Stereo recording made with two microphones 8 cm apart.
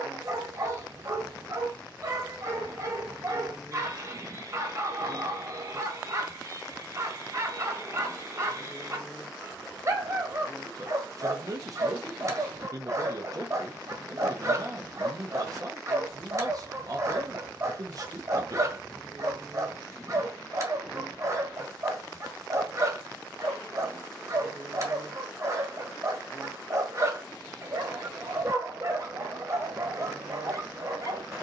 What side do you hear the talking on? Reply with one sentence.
In this clip you hear the talking on the right.